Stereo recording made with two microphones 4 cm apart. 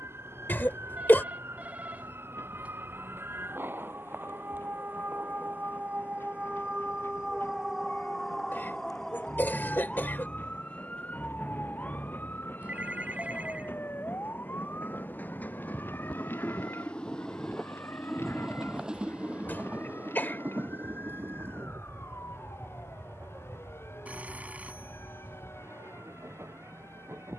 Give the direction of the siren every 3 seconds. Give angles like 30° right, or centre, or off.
70° right, 50° right, 20° right, 20° left, 40° left, 50° left, 60° left, 60° left, 70° left.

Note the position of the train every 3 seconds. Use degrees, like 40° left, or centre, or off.
70° left, 70° left, 70° left, 60° left, 50° left, 30° left, 30° right, 60° right, 80° right.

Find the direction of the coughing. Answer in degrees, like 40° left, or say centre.
50° left.